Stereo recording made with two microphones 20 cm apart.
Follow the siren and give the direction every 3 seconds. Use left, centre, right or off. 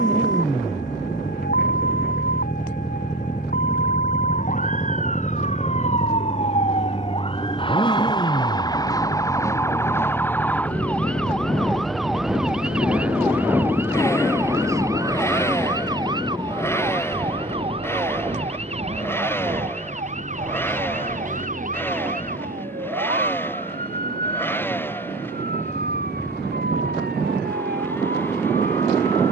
left, left, left, centre, centre, right, right, right, right, right.